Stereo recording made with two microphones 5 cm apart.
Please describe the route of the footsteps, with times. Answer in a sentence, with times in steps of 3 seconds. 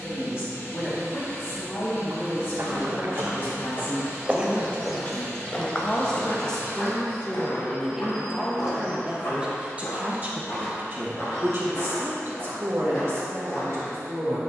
You can hear the footsteps on the right from 0 s, in the centre from 3 s and on the left from 6 s.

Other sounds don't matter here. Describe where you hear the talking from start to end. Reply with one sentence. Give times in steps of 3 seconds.
You can hear the talking on the left from 0 s, in the centre from 6 s and on the right from 9 s.